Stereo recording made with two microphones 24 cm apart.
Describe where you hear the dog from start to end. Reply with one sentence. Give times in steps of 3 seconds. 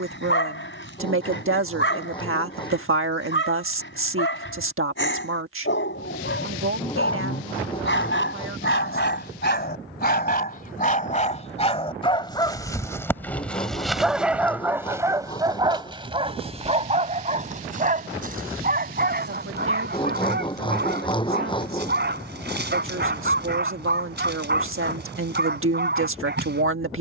You can hear the dog on the left from 0 s, in the centre from 12 s and on the right from 15 s.